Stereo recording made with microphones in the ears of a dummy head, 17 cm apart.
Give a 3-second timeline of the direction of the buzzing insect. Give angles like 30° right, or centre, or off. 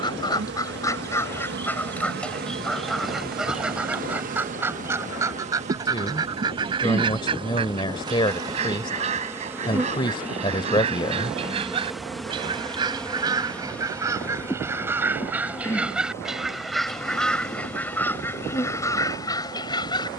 60° right, 40° right, 30° right, 10° right, 10° left, 20° left, 20° left.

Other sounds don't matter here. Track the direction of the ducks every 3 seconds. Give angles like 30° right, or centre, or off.
10° left, 10° right, 30° right, 30° right, 20° right, centre, 20° left.